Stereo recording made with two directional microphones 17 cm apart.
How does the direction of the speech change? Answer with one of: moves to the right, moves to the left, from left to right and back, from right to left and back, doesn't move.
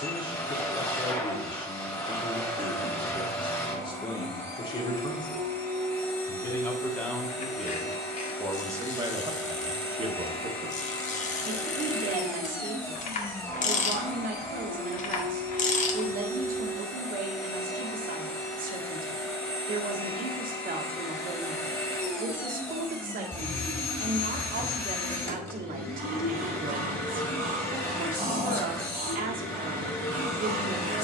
moves to the right.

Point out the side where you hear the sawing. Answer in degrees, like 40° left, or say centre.
50° right.